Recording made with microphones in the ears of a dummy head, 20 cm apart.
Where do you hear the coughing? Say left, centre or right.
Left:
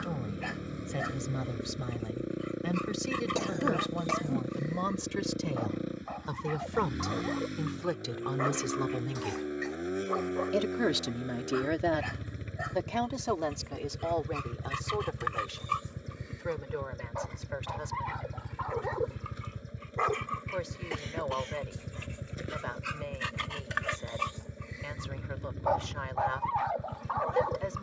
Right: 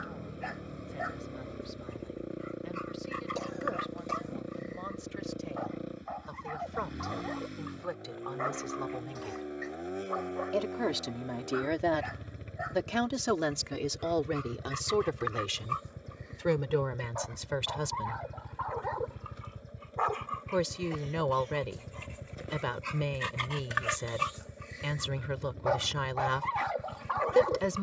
left.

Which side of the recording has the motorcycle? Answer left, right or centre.
left.